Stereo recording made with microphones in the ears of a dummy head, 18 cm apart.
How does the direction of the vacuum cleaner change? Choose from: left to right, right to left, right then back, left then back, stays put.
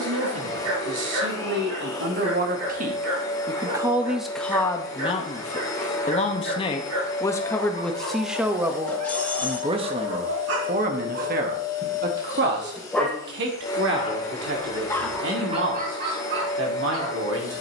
stays put.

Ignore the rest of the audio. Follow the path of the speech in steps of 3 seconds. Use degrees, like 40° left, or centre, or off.
60° right, 10° left, 10° left, 40° right, 60° right, 70° right.